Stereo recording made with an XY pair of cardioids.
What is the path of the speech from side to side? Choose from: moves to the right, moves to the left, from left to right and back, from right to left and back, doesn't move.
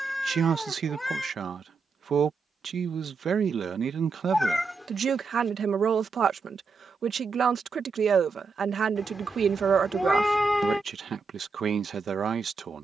doesn't move.